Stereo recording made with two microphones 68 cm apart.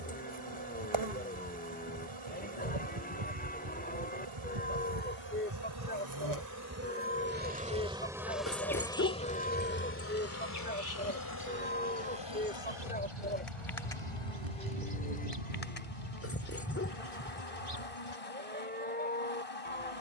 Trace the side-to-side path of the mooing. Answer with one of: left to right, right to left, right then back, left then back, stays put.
stays put.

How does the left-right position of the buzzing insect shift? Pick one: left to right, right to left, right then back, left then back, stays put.
right to left.